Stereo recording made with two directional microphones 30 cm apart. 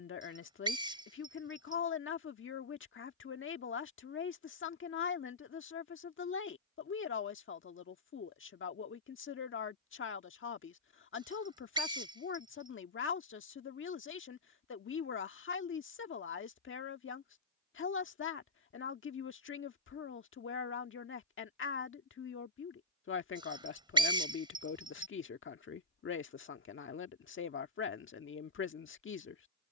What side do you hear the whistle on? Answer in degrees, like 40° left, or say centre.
10° right.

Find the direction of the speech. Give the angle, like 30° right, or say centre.
40° left.